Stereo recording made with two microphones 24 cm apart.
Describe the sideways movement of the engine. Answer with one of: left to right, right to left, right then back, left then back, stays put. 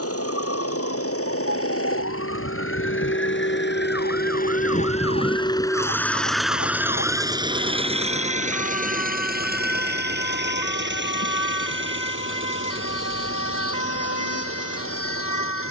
left to right.